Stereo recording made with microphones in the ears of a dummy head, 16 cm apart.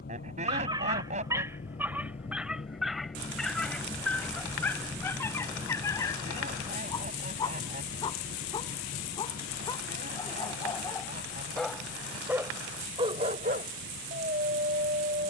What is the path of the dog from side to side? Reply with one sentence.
You can hear the dog go left and come back.